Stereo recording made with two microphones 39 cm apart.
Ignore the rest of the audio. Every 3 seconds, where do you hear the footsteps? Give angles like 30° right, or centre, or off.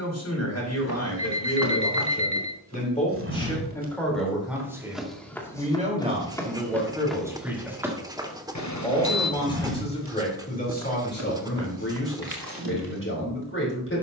60° right, 10° right, centre, 40° right, 60° right.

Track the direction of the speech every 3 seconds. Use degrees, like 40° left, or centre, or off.
30° left, centre, 10° right, 20° left, 30° left.